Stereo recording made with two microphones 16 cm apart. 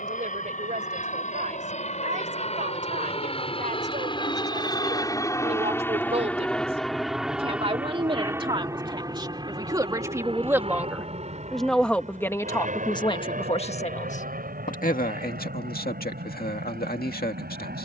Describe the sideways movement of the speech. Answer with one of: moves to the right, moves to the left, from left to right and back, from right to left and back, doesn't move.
moves to the left.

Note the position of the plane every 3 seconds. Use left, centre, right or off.
left, left, centre, right, right, right.